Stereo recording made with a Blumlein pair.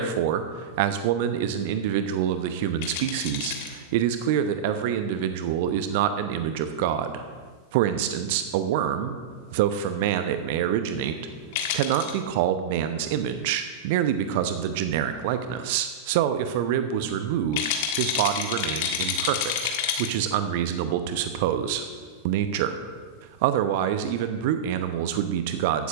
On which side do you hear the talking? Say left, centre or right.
right.